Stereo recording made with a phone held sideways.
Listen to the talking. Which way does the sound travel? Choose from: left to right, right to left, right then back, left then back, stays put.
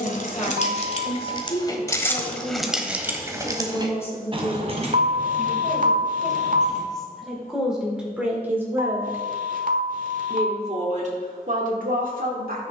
left to right.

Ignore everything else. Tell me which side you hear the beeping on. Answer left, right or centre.
right.